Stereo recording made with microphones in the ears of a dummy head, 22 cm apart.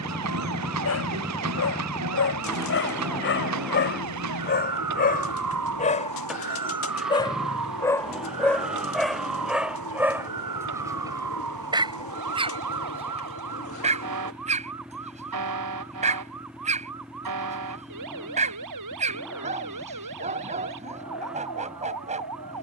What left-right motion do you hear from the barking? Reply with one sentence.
You can hear the barking go from the left side to the right.